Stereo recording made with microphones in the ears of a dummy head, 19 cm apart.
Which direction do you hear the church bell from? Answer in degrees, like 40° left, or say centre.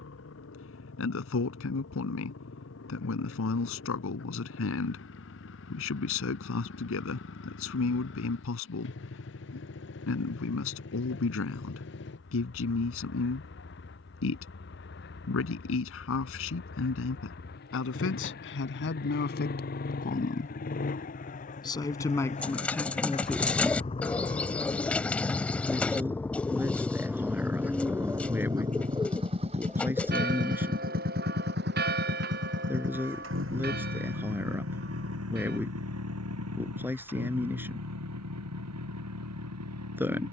50° right.